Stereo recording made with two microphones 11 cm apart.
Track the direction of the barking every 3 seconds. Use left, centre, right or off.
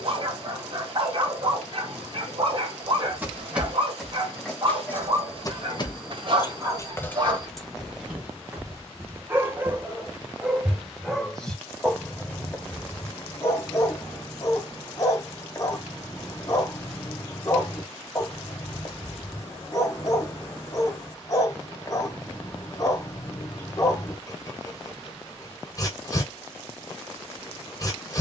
right, right, right, centre, left, left, left, left, left, left.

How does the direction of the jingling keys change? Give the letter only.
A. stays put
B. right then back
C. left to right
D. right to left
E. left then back
E.